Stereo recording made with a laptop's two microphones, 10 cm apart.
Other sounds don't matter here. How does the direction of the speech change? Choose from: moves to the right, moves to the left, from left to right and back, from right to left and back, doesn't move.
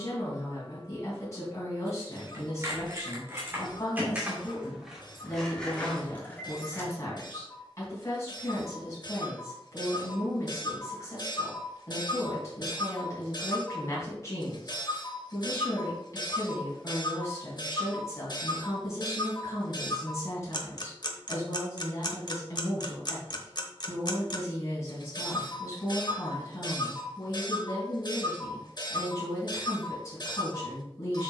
doesn't move.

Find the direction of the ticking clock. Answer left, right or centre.
left.